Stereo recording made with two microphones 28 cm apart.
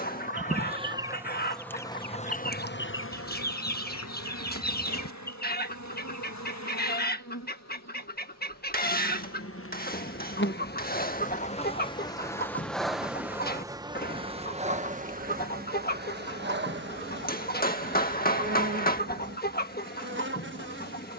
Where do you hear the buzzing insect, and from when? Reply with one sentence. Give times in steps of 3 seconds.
You can hear the buzzing insect in the centre from 0 s, on the left from 3 s, in the centre from 12 s and on the right from 15 s.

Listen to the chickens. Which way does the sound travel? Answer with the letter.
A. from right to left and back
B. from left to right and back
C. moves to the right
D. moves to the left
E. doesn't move
E.